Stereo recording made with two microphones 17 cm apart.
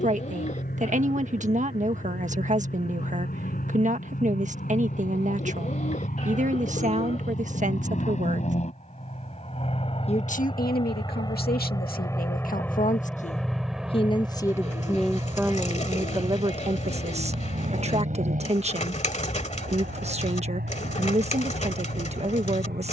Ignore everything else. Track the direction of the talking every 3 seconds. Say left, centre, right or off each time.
right, right, right, left, left, right, right, right.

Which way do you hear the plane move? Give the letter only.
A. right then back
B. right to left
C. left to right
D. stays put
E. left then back
C.